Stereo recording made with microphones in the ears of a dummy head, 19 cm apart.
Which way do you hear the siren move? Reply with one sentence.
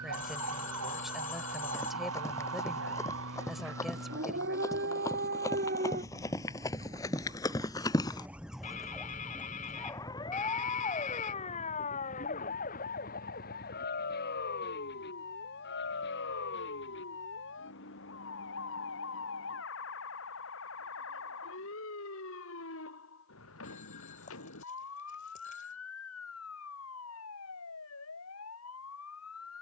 In this clip you hear the siren move from right to left.